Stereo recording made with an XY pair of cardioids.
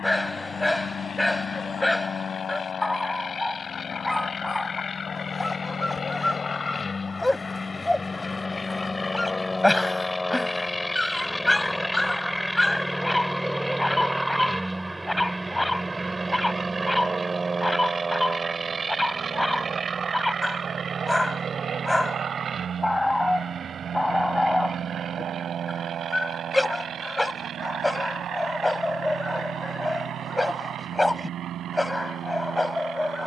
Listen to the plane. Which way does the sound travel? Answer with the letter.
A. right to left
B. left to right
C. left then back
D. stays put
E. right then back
B.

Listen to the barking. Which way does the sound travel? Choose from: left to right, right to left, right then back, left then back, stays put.
stays put.